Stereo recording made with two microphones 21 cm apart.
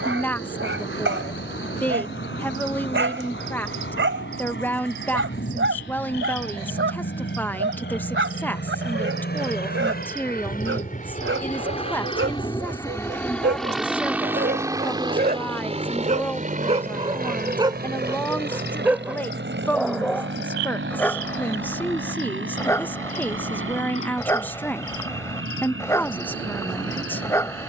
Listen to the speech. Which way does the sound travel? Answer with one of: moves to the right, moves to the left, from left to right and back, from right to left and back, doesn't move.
doesn't move.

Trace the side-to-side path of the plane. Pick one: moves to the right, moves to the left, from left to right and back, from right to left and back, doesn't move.
moves to the right.